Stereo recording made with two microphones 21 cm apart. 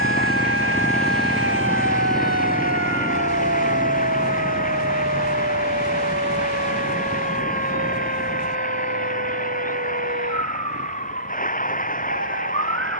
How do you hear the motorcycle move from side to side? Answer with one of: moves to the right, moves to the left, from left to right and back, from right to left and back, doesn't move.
moves to the right.